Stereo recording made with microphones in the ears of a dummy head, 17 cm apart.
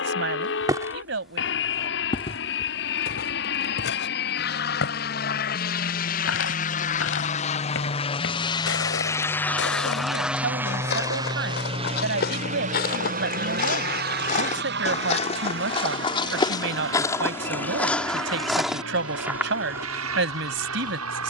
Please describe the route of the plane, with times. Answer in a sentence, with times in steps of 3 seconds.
In this clip you hear the plane on the left from 0 s, in the centre from 9 s and on the right from 12 s.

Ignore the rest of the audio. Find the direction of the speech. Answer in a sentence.
You can hear the speech on the right.